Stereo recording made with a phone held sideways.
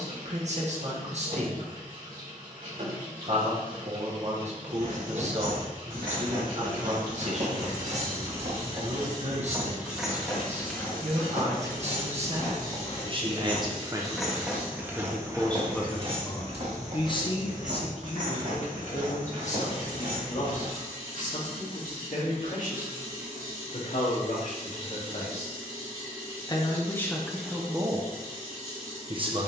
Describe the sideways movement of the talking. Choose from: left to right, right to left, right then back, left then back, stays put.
left then back.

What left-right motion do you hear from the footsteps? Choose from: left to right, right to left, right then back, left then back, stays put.
left then back.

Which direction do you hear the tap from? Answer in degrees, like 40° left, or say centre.
80° right.